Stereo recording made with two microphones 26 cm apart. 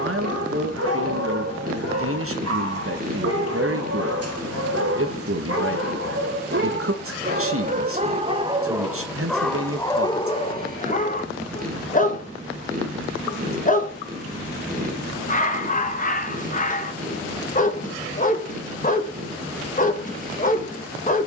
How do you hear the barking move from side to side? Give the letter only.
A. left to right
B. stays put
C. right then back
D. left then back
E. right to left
E.